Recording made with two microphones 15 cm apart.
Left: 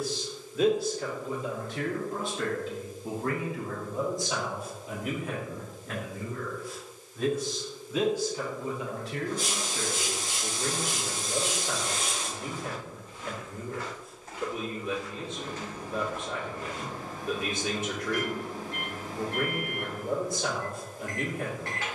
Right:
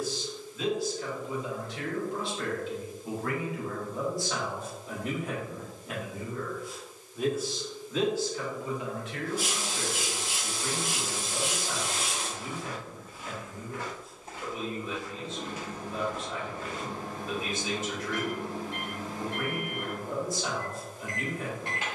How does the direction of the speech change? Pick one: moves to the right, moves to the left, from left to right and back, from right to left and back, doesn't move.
from left to right and back.